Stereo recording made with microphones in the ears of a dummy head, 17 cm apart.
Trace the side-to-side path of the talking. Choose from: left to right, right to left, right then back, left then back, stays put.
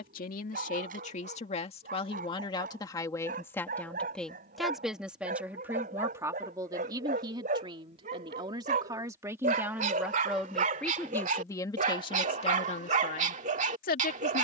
right then back.